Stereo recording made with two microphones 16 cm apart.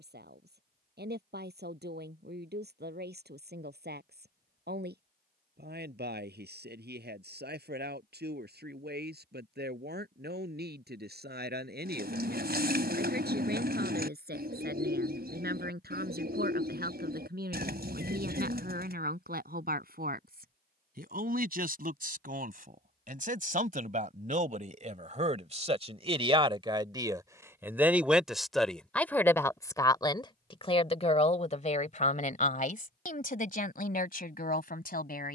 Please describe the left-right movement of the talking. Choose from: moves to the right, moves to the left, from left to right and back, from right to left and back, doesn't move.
moves to the left.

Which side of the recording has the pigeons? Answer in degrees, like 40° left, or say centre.
70° right.